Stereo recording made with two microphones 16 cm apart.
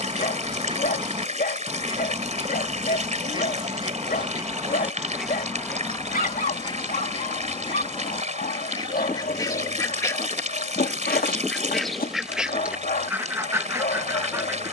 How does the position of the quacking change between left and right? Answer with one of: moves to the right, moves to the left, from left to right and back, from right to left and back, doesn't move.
from right to left and back.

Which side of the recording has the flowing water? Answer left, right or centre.
right.